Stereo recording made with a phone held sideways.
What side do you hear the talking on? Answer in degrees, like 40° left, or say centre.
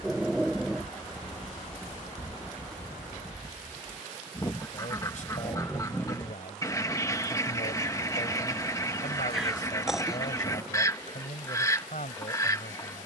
70° left.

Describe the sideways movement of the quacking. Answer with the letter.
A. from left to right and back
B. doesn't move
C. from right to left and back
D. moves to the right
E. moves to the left
B.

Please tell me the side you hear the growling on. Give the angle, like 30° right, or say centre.
centre.